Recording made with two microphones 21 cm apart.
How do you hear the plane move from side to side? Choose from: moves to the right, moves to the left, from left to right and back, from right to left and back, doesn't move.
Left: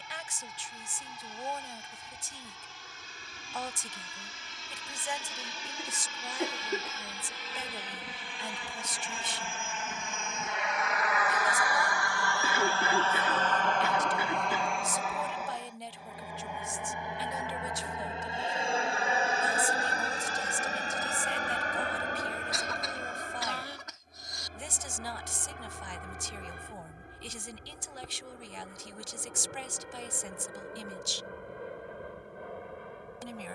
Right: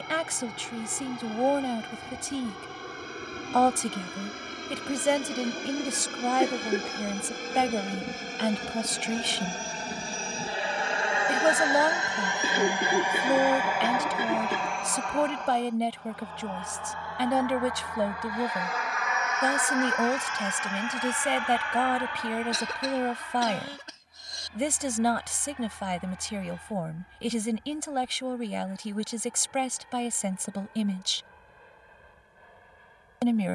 moves to the left.